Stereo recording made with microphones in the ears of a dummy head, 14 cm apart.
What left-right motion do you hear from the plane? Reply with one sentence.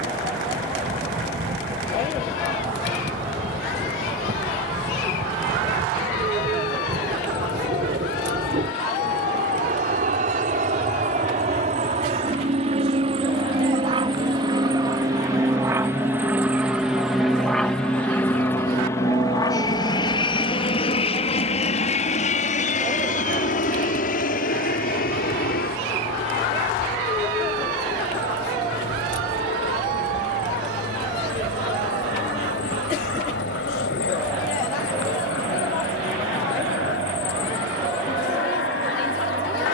In this clip you hear the plane go from the right side to the left.